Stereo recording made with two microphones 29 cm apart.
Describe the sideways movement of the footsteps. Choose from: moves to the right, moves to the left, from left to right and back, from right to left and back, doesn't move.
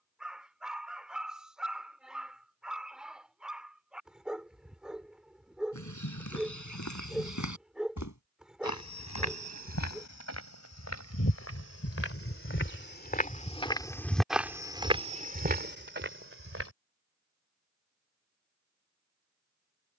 moves to the right.